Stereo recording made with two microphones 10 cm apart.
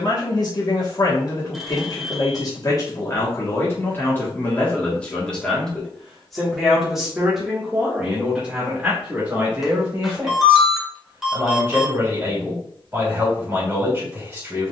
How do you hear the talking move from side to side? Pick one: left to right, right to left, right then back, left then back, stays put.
left to right.